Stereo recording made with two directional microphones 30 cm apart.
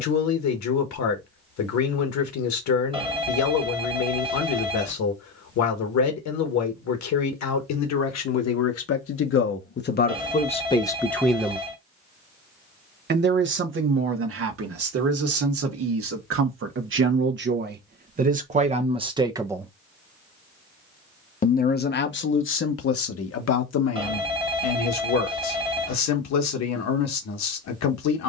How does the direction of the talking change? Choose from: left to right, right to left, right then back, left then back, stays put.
right then back.